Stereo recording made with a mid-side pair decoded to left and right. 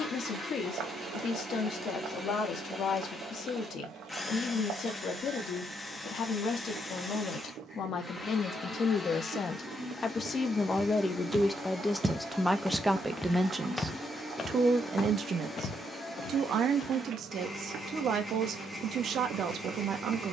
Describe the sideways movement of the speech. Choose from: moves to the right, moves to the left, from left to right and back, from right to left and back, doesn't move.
moves to the right.